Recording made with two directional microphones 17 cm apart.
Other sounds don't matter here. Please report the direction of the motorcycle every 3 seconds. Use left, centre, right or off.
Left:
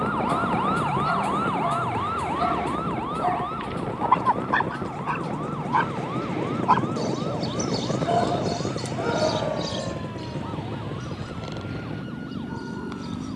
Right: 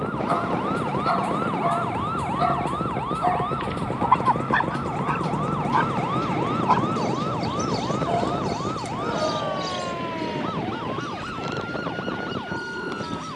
right, right, centre, left, left.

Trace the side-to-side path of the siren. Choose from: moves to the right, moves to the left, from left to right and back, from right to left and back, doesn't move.
moves to the right.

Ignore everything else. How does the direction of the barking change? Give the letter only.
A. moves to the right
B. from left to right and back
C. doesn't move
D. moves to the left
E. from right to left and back
E.